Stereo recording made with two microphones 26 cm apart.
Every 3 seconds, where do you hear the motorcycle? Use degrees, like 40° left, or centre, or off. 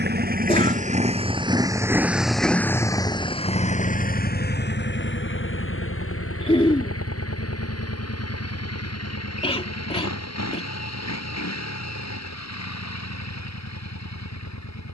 20° right, 40° left, 60° left, 70° left, 80° left.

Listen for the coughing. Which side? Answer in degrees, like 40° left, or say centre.
20° left.